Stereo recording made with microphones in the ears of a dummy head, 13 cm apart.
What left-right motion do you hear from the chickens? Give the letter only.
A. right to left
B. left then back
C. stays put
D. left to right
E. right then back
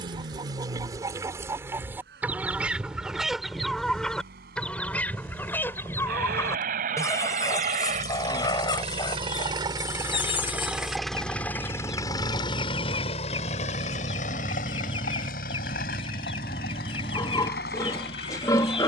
A.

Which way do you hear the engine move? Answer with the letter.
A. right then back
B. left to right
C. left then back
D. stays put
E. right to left
E.